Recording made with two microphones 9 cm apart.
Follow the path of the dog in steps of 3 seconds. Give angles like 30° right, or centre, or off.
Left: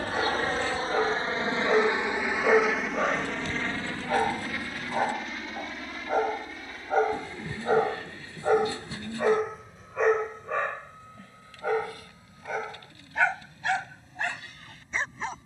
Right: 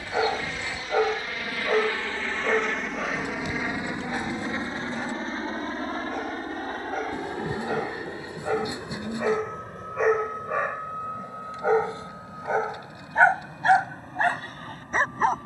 centre, 40° left, 30° left, 10° right, 40° right.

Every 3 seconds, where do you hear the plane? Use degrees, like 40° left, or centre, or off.
30° left, 20° right, 50° right, 60° right, 60° right.